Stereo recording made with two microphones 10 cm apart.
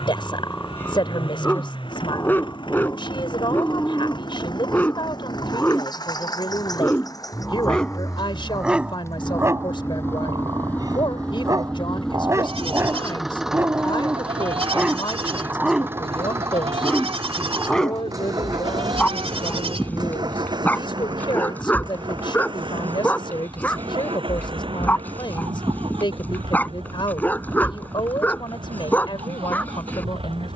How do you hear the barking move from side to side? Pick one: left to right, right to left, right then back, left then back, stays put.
right then back.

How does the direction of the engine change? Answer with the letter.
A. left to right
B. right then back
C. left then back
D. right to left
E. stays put
A.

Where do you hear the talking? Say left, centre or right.
left.